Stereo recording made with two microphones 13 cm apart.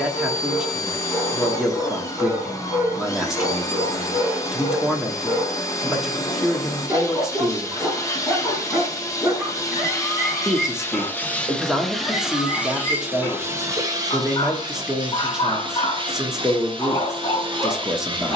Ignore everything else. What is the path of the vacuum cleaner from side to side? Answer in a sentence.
In this clip you hear the vacuum cleaner move to the right.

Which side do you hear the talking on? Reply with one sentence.
In this clip you hear the talking in the centre.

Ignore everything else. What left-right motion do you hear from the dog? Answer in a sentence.
You can hear the dog move to the left.